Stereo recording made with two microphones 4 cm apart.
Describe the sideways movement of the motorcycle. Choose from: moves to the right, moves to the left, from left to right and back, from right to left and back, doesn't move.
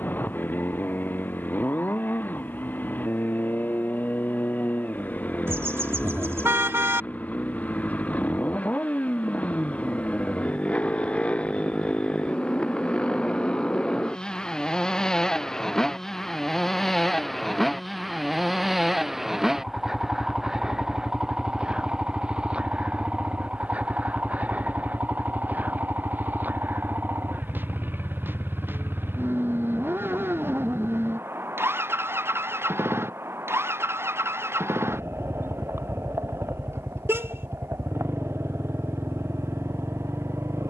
moves to the right.